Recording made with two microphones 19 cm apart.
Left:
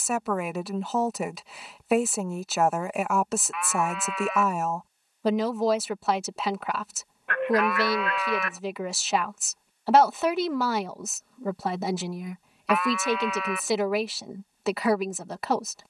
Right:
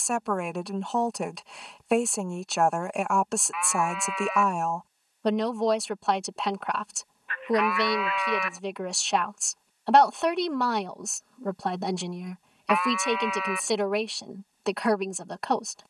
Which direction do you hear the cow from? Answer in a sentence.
You can hear the cow in the centre.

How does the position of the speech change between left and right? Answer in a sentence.
You can hear the speech stay in one place.